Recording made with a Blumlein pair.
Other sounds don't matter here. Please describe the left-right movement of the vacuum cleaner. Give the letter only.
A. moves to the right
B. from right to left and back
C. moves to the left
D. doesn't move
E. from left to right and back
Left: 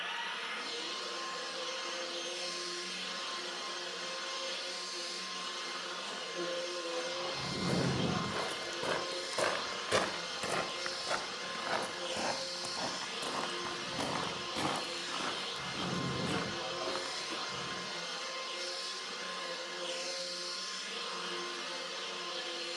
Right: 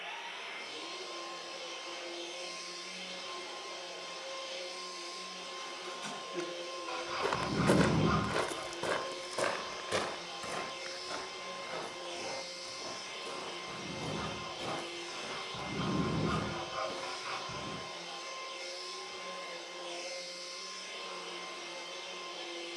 D.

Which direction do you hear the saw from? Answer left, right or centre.
right.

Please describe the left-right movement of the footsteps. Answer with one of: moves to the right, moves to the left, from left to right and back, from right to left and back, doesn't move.
moves to the left.